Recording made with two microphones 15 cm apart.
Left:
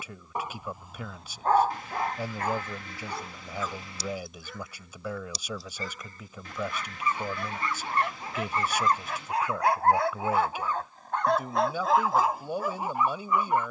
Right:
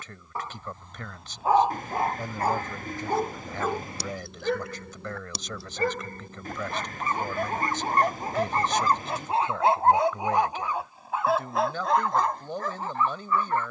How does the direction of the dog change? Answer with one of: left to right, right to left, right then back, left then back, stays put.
right then back.